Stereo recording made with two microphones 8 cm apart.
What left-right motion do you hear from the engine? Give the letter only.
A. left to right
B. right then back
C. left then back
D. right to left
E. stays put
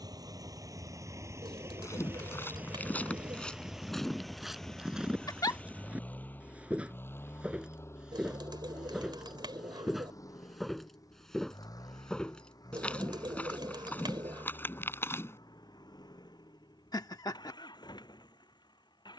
D.